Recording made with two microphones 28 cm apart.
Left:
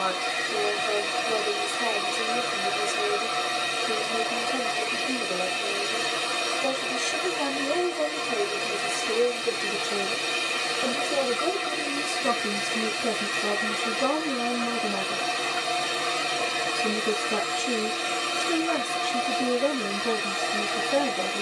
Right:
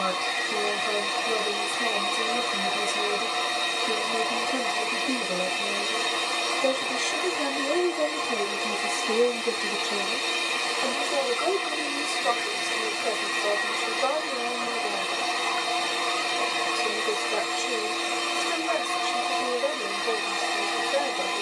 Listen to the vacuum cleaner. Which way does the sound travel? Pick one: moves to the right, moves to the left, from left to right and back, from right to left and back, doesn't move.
doesn't move.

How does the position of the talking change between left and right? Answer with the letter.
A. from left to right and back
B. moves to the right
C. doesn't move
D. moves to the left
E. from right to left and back
D.